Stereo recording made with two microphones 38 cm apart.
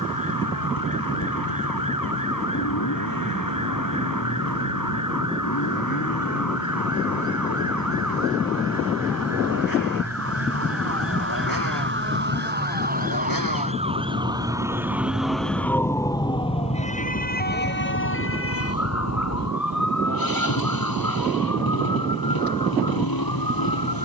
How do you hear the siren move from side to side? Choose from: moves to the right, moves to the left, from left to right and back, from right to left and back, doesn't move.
moves to the left.